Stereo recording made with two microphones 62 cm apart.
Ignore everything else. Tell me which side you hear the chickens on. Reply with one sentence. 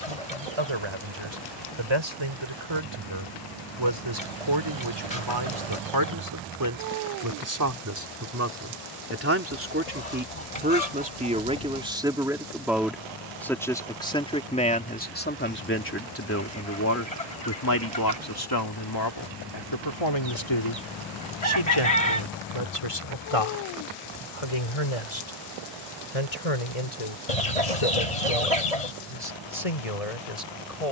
In this clip you hear the chickens on the left.